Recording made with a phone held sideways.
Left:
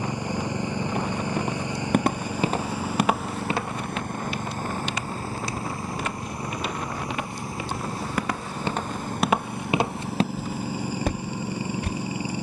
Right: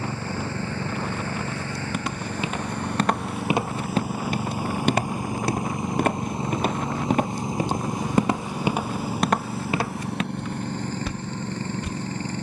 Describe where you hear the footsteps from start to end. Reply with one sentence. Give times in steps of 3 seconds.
You can hear the footsteps on the left from 0 s, on the right from 3 s and on the left from 9 s.